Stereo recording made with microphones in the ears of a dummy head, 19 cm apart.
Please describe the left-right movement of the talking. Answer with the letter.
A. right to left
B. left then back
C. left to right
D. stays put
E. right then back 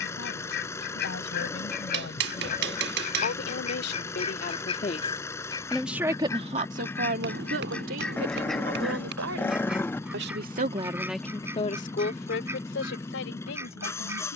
E.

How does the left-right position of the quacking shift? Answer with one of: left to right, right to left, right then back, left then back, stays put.
left to right.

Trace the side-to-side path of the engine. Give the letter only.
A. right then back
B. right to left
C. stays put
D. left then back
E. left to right
C.